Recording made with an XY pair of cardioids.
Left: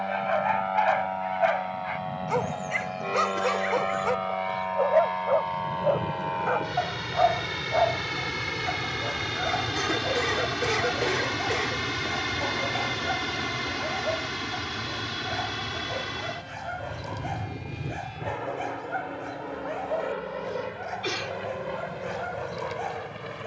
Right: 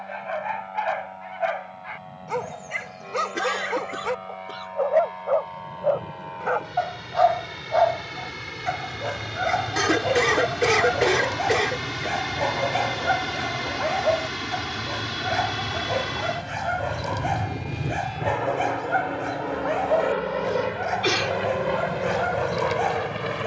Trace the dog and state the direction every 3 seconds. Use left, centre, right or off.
centre, centre, right, right, right, right, right, right.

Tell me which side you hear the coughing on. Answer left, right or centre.
right.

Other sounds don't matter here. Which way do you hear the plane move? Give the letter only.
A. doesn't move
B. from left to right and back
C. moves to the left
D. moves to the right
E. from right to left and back
D.